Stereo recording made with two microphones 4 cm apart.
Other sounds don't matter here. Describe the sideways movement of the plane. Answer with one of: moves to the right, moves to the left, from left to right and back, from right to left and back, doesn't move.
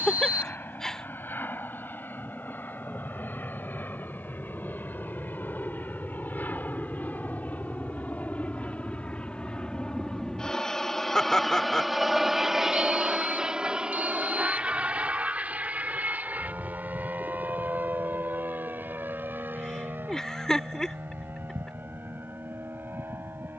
moves to the right.